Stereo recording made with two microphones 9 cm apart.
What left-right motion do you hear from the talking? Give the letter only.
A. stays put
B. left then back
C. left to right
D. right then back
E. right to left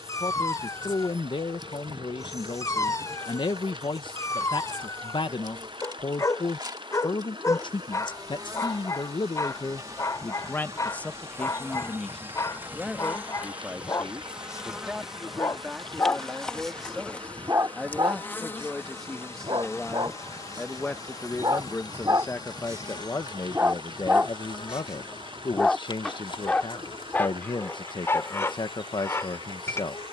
D.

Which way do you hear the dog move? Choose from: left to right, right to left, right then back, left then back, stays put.
right then back.